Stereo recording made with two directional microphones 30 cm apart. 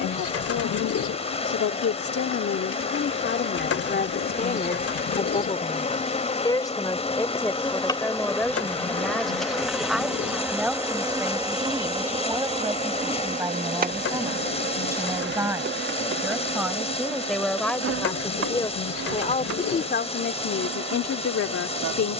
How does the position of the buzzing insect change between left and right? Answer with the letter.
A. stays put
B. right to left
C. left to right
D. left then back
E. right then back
C.